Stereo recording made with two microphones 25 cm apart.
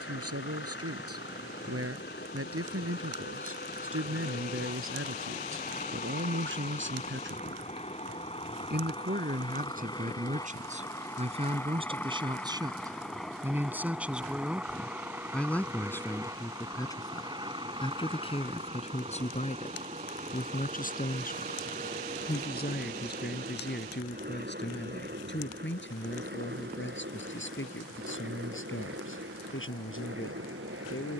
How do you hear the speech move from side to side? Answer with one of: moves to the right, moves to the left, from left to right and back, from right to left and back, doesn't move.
moves to the left.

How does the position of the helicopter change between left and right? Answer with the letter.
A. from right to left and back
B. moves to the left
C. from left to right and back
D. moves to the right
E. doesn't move
D.